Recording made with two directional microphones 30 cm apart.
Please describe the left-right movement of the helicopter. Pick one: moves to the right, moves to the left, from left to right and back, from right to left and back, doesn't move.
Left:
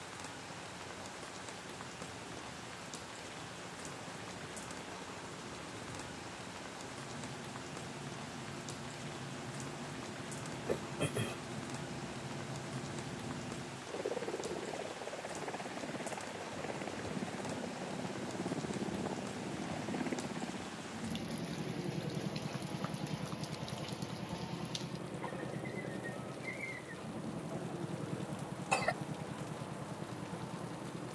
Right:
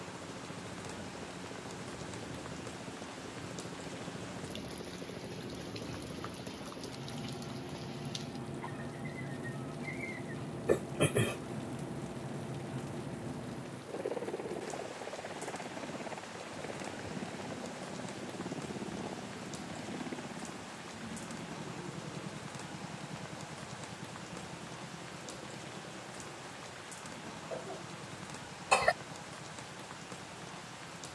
moves to the left.